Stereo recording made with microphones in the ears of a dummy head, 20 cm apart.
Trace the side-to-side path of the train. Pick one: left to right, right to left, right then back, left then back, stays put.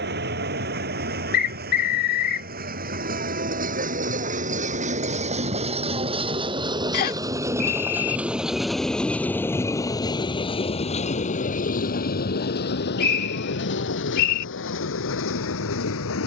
right to left.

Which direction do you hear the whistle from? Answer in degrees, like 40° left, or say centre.
50° left.